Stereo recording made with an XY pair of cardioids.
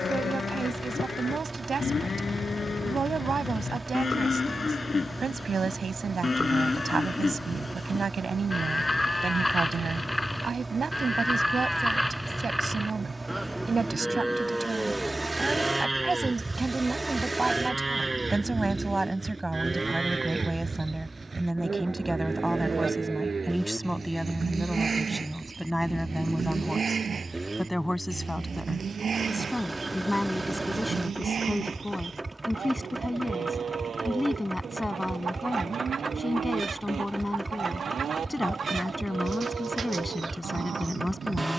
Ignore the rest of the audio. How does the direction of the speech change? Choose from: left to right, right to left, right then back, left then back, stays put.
right to left.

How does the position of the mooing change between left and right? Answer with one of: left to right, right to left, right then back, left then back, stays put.
left to right.